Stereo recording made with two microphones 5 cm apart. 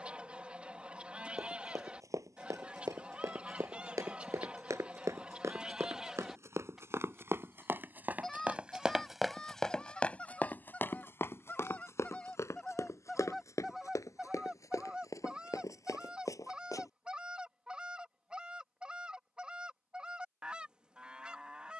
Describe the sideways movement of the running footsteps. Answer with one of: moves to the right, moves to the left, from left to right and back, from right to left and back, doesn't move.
moves to the left.